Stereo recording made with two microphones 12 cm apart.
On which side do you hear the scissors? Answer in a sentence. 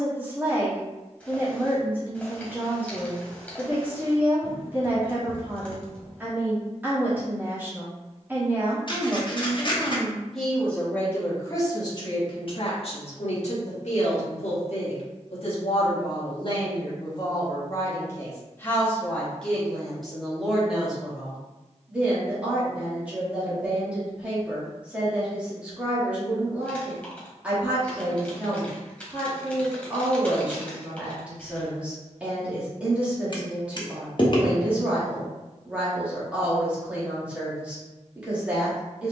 You can hear the scissors on the left.